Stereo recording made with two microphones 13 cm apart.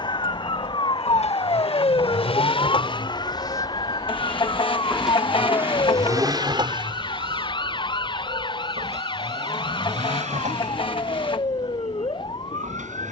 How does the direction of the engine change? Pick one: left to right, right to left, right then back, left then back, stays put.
left to right.